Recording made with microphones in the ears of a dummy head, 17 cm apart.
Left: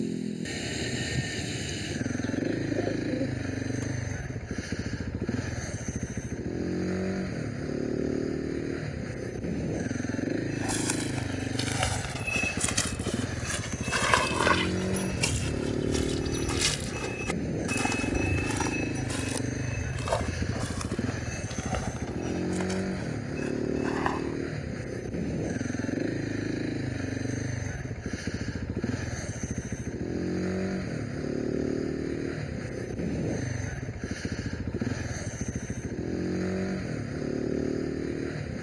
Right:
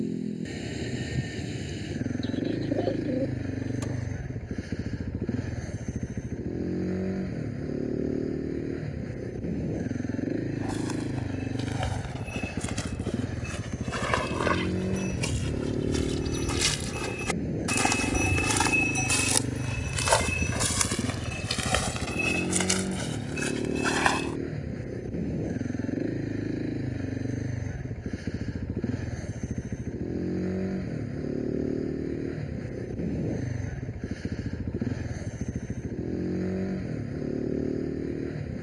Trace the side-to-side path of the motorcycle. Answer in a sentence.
In this clip you hear the motorcycle stay in one place.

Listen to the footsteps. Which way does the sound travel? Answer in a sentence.
In this clip you hear the footsteps travel towards the right.